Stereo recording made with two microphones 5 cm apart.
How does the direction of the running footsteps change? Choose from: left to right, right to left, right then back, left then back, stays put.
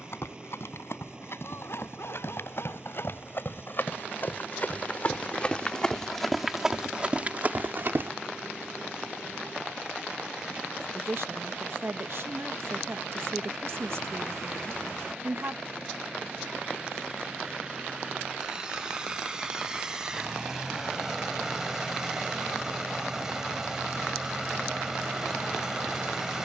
left to right.